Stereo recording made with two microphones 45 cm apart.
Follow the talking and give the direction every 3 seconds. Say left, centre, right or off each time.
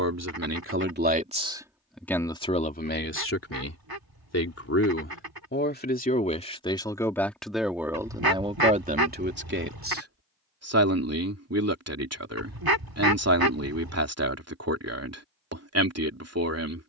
centre, left, centre, right, right, right.